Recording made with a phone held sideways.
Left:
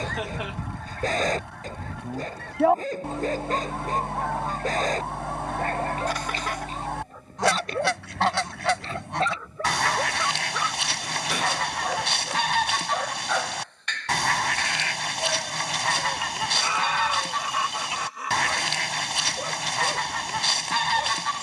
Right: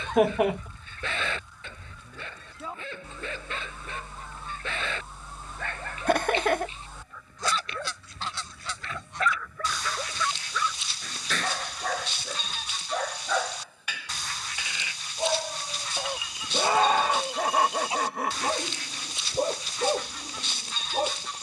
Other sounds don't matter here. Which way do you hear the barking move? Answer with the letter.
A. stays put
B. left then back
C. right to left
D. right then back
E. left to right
E.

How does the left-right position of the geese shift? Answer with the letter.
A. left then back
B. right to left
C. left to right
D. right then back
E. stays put
E.